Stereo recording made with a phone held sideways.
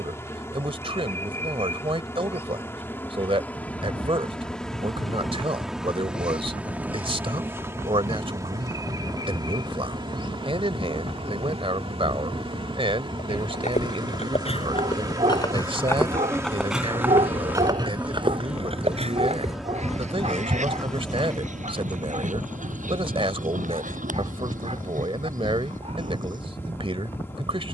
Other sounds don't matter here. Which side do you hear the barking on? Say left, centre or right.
right.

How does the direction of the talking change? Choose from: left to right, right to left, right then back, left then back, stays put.
stays put.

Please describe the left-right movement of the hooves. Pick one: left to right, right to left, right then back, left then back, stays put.
left to right.